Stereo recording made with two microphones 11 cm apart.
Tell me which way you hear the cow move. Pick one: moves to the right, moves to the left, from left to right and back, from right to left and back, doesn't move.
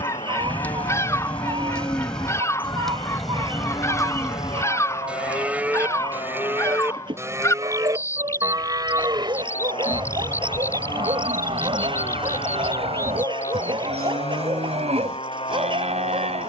moves to the right.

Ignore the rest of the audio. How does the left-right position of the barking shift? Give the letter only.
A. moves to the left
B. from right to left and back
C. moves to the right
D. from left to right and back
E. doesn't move
E.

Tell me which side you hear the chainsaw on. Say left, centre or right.
left.